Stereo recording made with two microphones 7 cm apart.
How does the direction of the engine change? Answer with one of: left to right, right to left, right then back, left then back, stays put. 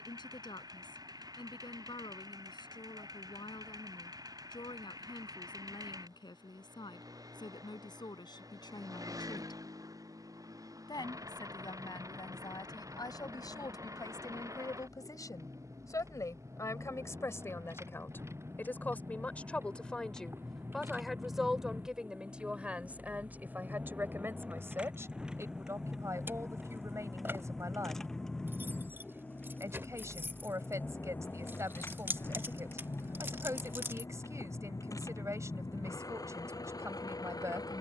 right to left.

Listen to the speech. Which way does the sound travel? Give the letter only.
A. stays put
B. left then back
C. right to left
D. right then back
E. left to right
E.